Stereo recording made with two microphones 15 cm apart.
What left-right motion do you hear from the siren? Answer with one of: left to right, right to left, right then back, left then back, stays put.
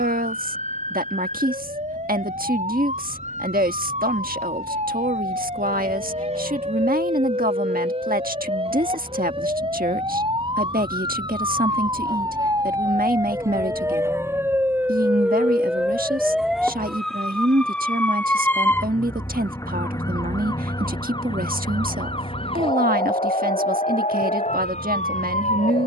right to left.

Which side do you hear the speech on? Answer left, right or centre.
right.